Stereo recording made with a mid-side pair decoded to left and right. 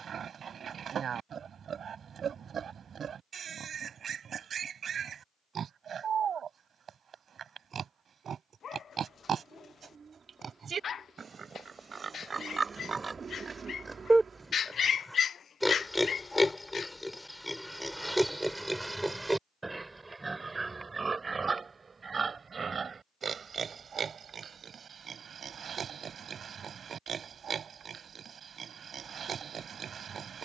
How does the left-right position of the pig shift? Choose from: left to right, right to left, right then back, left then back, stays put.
left then back.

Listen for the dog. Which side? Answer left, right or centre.
left.